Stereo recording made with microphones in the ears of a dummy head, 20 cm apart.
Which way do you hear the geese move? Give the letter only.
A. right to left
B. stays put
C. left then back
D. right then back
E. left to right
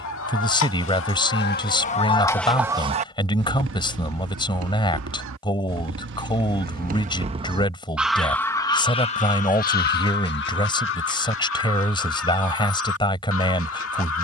D.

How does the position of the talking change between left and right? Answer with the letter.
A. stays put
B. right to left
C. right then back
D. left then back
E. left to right
A.